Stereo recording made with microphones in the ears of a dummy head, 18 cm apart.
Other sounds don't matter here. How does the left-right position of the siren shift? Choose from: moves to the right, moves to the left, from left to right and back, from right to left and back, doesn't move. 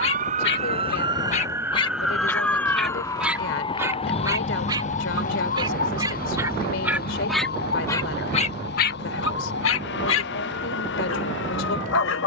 moves to the left.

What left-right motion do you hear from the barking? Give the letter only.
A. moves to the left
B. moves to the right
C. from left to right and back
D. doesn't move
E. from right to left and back
C.